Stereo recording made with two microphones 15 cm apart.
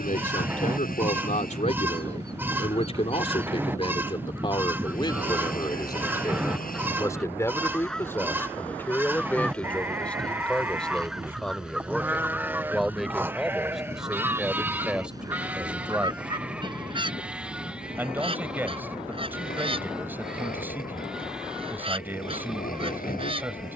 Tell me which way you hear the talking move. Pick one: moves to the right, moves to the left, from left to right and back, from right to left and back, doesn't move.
moves to the right.